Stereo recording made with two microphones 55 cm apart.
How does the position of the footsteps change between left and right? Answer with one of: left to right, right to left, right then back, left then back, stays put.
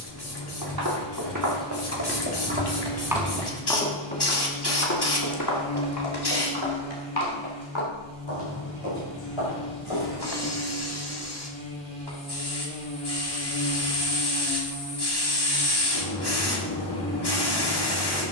right to left.